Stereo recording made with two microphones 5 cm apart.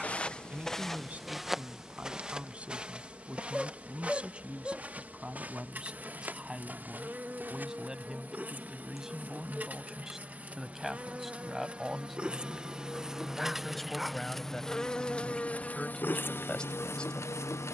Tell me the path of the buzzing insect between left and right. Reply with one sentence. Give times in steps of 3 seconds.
You can hear the buzzing insect on the right from 0 s, in the centre from 12 s and on the left from 15 s.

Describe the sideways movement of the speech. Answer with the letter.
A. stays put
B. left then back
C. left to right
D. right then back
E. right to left
E.